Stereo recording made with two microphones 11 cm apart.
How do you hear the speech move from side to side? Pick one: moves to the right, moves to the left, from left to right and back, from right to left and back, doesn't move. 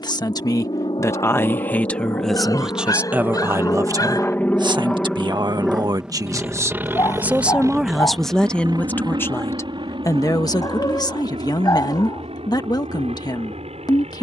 from left to right and back.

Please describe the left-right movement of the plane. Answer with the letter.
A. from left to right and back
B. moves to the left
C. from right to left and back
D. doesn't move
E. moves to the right
E.